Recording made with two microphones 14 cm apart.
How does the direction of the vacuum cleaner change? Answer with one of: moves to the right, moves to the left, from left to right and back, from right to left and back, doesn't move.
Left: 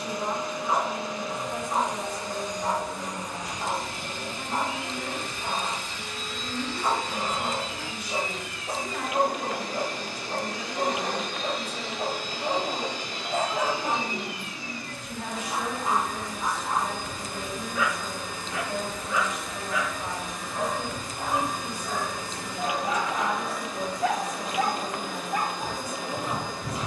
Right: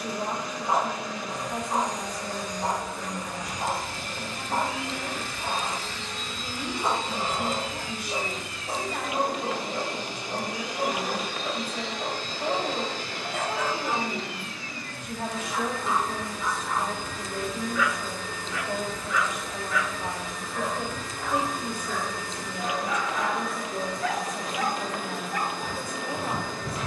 from left to right and back.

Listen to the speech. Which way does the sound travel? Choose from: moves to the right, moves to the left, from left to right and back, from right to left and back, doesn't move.
doesn't move.